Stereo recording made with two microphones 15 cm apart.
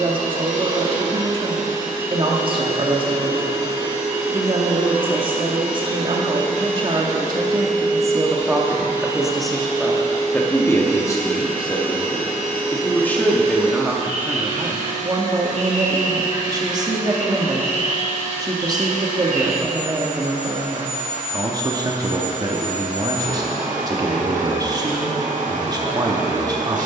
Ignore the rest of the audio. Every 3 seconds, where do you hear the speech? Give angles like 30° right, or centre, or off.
30° right, 30° right, 30° right, 10° left, centre, 30° right, 30° right, 30° right, 30° right.